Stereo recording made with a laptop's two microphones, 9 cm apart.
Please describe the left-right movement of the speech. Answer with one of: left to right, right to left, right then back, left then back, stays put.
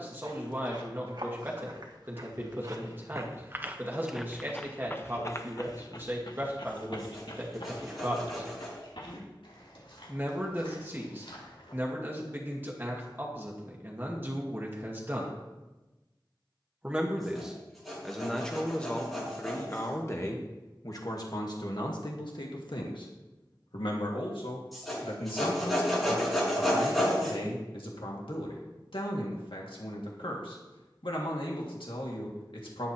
right to left.